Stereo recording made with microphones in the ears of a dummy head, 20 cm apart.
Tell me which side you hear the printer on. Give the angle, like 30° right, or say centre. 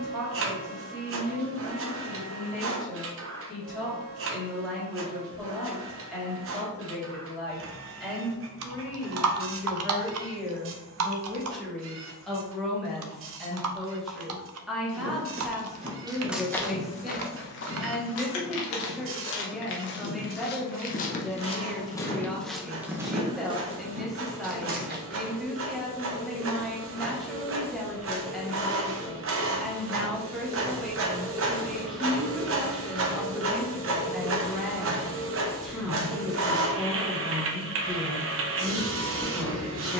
60° right.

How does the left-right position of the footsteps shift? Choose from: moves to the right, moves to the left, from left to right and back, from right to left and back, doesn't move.
from right to left and back.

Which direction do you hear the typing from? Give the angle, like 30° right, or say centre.
70° right.